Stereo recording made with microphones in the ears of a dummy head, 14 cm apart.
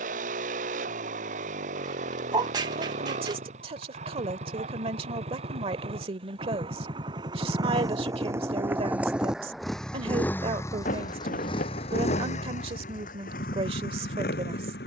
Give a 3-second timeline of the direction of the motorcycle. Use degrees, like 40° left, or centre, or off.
50° right, 40° right, 30° right, 20° left, 60° left.